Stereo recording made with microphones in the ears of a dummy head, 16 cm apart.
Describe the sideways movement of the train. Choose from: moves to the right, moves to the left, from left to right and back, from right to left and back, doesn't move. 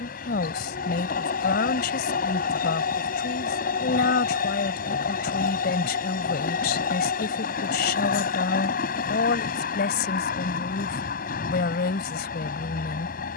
doesn't move.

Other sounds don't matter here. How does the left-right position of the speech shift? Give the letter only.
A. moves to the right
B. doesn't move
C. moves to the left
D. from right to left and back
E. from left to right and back
B.